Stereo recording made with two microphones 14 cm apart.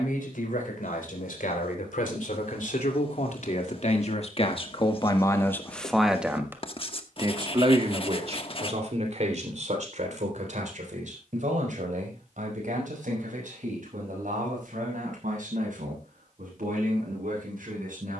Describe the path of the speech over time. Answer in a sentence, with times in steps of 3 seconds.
You can hear the speech on the left from 0 s and on the right from 6 s.